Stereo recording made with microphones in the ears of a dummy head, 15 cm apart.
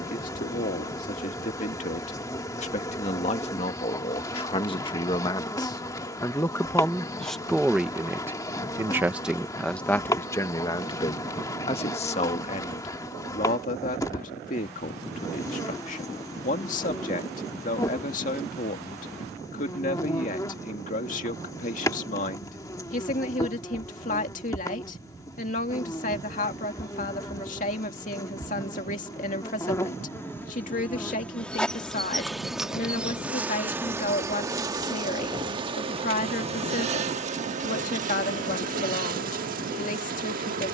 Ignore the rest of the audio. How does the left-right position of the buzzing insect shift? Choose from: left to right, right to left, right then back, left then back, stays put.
left to right.